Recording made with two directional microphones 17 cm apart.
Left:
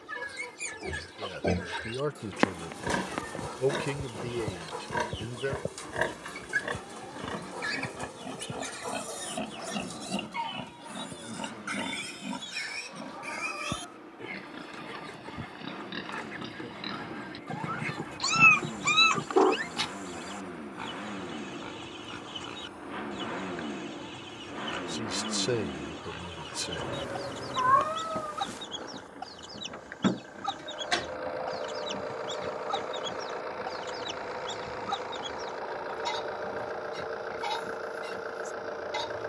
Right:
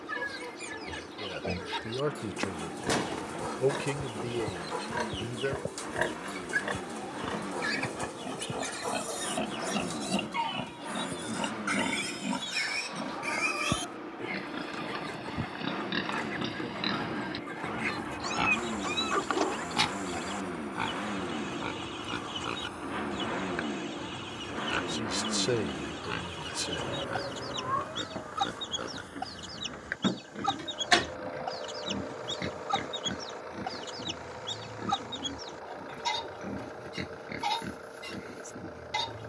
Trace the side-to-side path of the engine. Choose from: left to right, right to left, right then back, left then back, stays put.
right to left.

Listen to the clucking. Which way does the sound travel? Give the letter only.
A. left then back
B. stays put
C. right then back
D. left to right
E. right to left
B.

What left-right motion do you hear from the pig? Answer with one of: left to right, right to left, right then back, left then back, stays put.
left to right.